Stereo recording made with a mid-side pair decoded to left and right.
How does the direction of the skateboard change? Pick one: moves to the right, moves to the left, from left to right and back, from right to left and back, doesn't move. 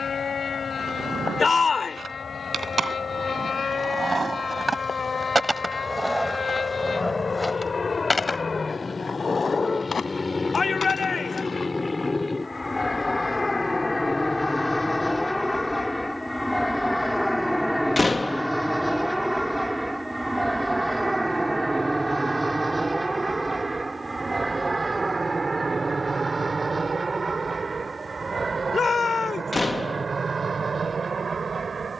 moves to the left.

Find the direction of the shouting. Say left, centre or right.
left.